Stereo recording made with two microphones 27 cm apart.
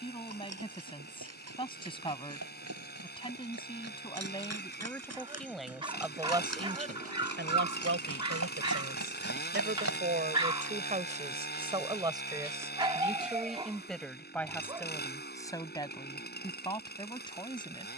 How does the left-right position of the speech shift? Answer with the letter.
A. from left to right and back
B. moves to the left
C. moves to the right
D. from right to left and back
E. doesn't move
A.